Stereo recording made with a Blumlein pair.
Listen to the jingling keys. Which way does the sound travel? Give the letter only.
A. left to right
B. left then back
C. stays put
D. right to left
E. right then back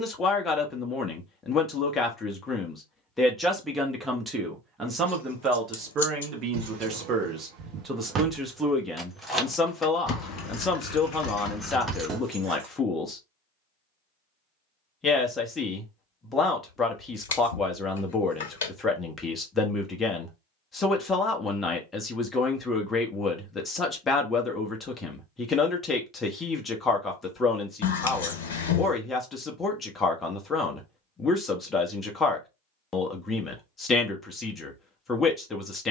B.